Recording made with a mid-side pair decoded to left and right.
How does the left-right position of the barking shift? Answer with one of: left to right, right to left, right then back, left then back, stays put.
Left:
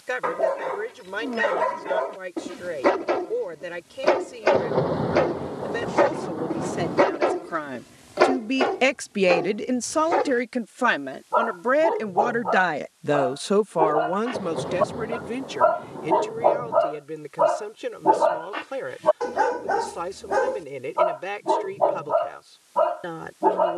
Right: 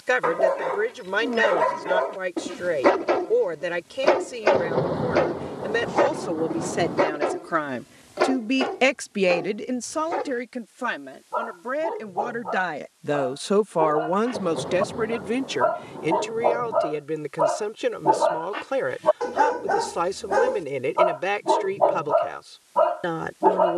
left then back.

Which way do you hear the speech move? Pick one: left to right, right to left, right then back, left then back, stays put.
left then back.